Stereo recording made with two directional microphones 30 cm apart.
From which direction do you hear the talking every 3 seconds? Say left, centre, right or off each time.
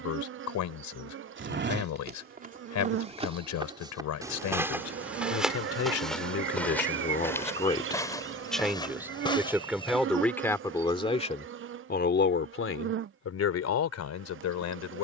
left, left, left, centre, left.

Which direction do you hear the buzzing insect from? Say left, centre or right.
right.